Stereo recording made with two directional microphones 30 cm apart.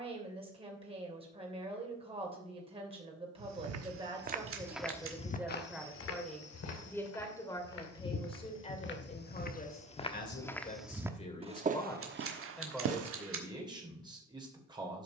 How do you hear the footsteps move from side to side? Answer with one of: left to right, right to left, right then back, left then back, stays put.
left then back.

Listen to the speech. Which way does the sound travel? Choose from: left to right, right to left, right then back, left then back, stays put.
left then back.